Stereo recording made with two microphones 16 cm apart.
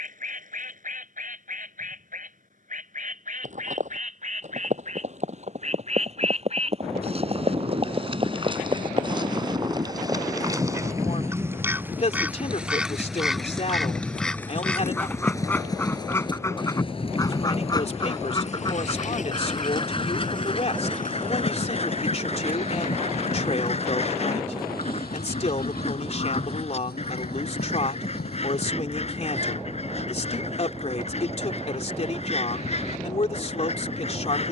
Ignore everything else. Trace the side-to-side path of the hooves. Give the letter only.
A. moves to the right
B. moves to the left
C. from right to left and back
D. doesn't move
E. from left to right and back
B.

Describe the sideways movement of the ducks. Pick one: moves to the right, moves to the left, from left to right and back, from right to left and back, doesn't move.
moves to the left.